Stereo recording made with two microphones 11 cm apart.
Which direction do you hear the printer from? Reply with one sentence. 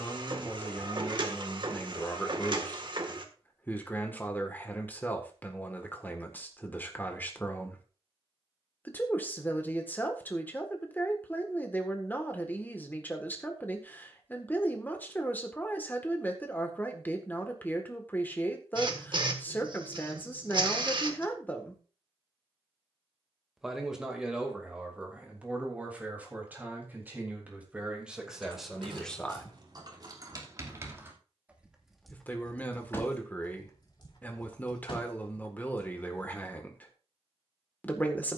You can hear the printer on the right.